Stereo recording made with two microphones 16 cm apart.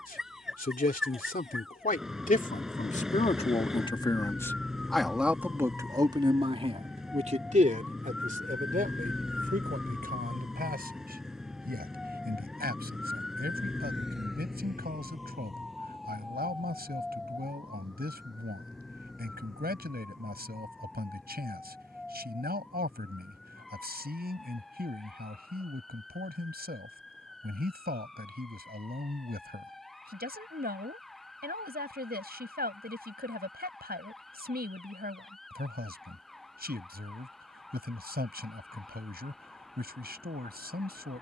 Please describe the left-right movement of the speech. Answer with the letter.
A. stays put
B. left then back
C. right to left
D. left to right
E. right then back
D.